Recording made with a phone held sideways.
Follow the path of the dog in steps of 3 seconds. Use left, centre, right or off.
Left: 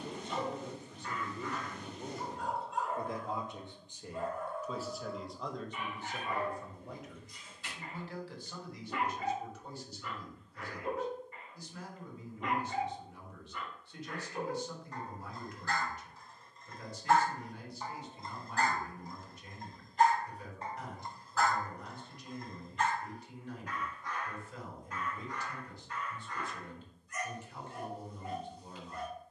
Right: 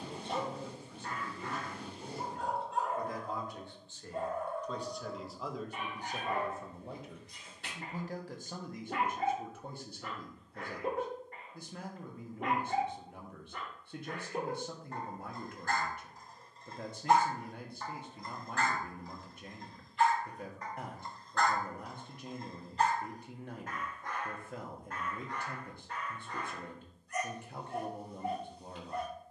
right, right, right, right, right, right, left, right, right, right.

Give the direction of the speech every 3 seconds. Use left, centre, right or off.
left, centre, right, right, right, right, right, right, right, right.